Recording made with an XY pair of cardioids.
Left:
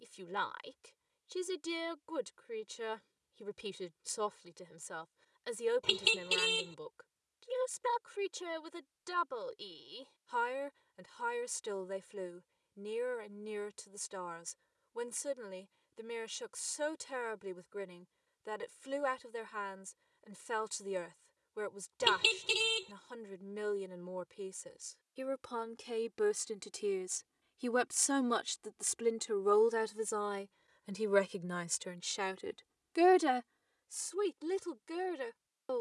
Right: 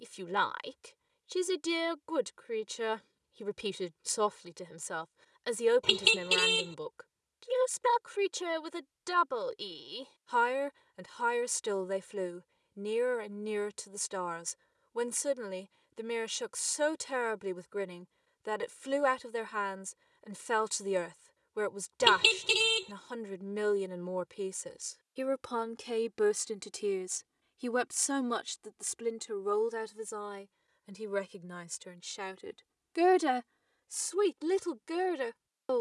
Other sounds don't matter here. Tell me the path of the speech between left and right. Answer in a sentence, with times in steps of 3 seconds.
You can hear the speech on the right from 0 s, in the centre from 27 s, on the left from 30 s and on the right from 33 s.